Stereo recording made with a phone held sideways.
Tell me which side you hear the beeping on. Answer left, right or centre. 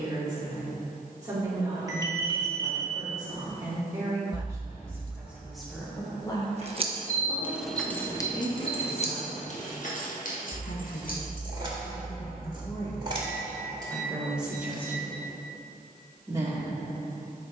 right.